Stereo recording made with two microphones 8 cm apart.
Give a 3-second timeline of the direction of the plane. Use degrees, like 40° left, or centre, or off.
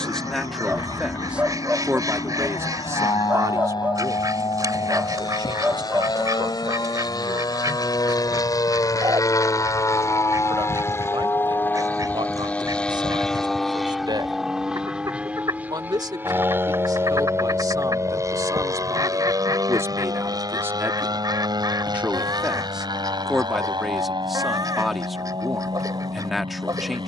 70° left, 70° left, 60° left, 40° left, centre, 20° right, 40° right, 50° right, 60° right.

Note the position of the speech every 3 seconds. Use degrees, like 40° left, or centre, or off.
20° right, 50° right, 60° right, 70° right, 70° right, 50° right, 40° right, 10° right, centre.